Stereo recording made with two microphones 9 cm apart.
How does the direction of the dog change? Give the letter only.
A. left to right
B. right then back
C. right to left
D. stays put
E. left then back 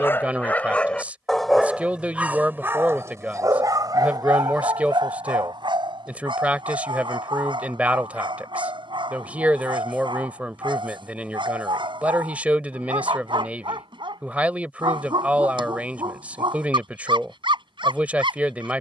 A.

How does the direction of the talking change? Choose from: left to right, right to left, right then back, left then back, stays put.
stays put.